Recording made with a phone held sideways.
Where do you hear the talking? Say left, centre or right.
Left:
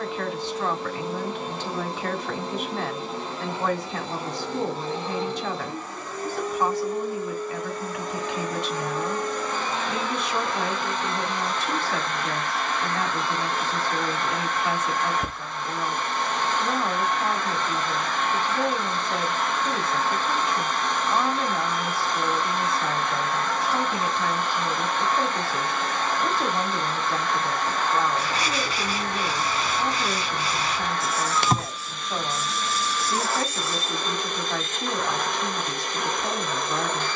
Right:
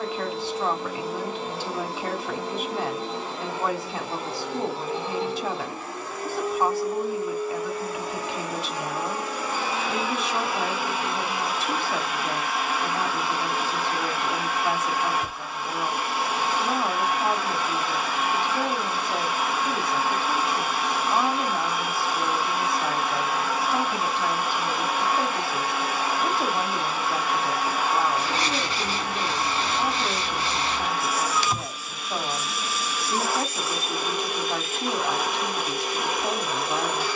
centre.